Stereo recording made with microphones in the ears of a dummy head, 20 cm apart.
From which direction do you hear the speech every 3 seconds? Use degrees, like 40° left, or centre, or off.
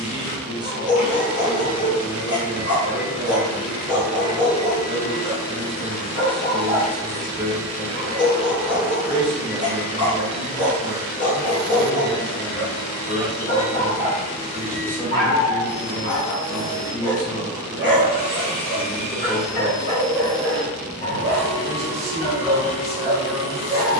20° right, 20° right, 20° right, 20° right, 10° right, 20° left, centre, 10° right.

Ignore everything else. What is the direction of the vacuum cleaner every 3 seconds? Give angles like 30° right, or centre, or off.
80° left, 70° left, 20° left, 20° left, 70° left, 80° left, 80° left, 80° left.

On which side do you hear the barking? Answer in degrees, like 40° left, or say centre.
40° left.